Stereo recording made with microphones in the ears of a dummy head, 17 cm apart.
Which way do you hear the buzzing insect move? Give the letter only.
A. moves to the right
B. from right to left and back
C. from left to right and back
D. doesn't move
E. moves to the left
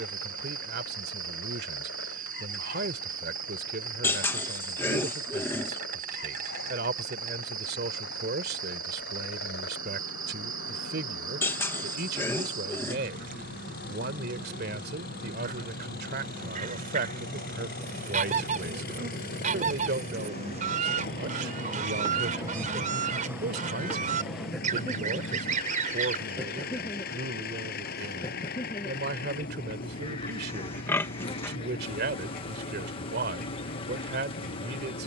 E.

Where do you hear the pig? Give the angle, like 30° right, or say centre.
10° left.